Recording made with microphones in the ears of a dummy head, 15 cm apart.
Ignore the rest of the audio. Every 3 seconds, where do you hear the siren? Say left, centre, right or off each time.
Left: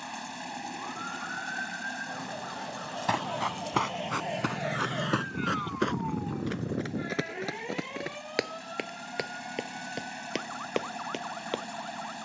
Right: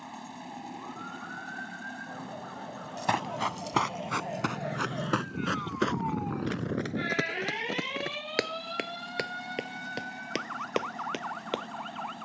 left, left, right, right.